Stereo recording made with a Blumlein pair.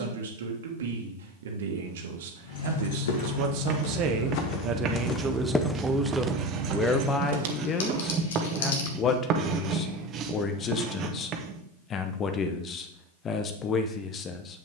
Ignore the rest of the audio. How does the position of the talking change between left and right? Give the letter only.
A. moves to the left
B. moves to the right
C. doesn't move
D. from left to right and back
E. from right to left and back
A.